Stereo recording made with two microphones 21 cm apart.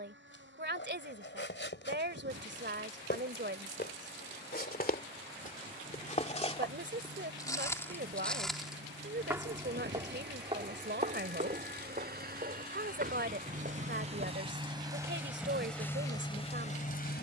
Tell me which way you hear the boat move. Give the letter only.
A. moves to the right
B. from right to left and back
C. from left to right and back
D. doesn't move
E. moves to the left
E.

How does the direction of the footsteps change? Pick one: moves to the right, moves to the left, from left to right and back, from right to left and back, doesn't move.
moves to the right.